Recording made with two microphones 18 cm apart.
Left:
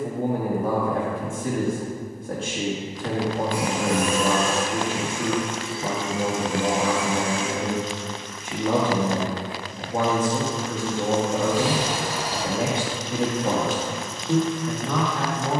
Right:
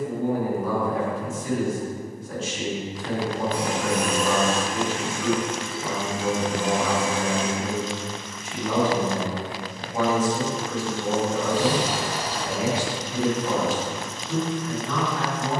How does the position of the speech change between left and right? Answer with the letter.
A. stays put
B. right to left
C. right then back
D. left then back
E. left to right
A.